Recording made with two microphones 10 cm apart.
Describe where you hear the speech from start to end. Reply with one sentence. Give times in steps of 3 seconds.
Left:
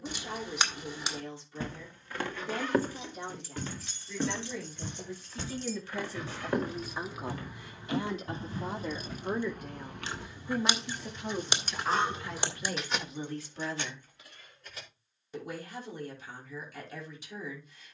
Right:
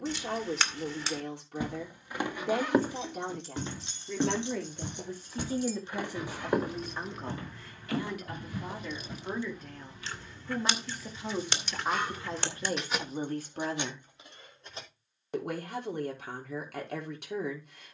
In this clip you hear the speech on the right from 0 s, in the centre from 6 s and on the right from 12 s.